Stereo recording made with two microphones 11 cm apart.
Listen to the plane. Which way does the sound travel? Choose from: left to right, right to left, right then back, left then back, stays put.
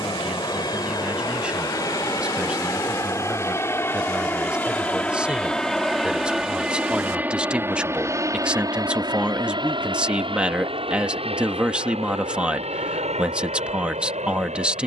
left to right.